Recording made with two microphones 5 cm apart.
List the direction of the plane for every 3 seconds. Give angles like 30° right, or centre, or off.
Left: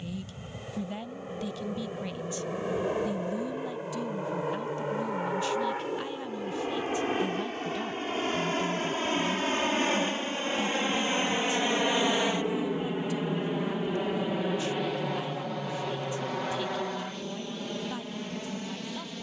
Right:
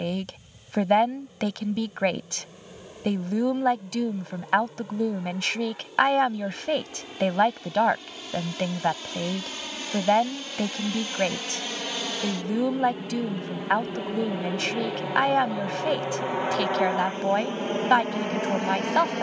50° left, 50° left, 40° left, 30° left, 10° left, 20° right, 40° right.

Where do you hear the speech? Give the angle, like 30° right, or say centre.
70° right.